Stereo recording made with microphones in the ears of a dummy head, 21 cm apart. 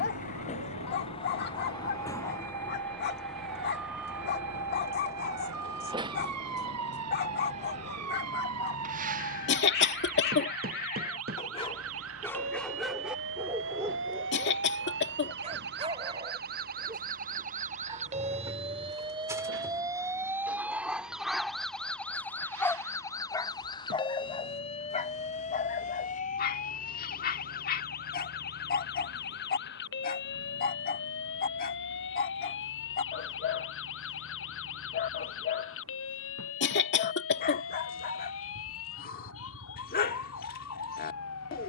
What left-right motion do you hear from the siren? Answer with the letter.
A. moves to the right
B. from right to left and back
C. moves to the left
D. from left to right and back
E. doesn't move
C.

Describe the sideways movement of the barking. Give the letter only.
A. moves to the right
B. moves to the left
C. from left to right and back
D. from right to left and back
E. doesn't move
C.